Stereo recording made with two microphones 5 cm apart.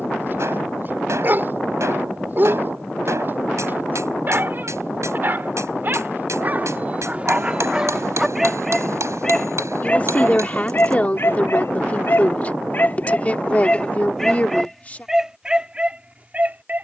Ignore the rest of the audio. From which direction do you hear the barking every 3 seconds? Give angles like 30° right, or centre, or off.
40° right, 40° right, 20° right, 40° left, 20° left, 20° right.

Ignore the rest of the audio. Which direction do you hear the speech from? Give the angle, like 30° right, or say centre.
30° left.